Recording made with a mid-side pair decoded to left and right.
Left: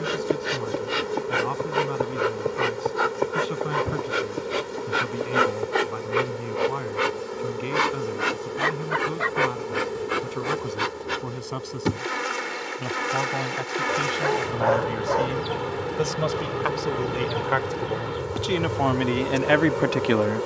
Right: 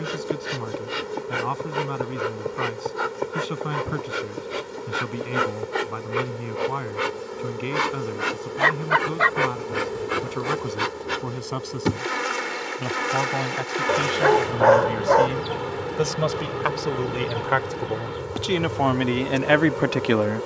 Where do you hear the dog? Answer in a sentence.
You can hear the dog on the right.